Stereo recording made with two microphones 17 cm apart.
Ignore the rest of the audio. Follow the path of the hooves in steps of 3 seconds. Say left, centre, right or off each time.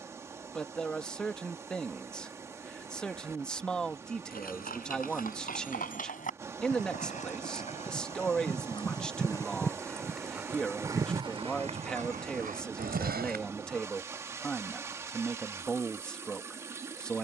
off, left, left, centre, right, off.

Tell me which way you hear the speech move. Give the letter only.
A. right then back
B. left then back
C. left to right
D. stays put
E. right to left
D.